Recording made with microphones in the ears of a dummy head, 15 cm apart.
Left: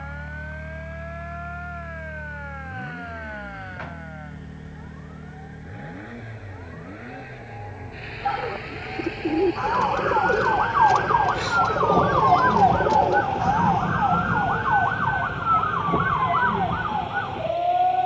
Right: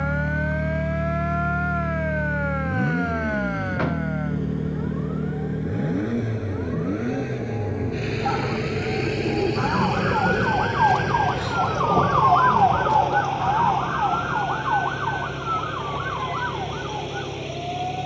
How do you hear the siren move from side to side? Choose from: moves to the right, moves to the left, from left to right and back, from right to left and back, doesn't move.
moves to the left.